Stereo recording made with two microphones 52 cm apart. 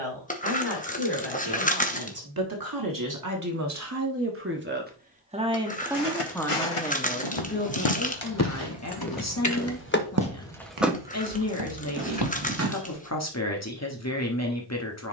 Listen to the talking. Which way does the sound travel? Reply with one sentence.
You can hear the talking move from right to left.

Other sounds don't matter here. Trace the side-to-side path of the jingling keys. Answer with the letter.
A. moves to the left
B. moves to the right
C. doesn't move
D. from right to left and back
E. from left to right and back
B.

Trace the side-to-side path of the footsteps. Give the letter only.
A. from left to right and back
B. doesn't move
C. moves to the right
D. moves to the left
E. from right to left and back
C.